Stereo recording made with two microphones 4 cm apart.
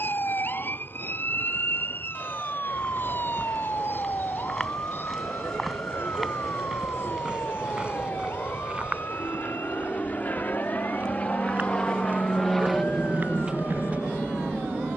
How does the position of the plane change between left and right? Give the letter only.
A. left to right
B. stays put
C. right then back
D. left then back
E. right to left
A.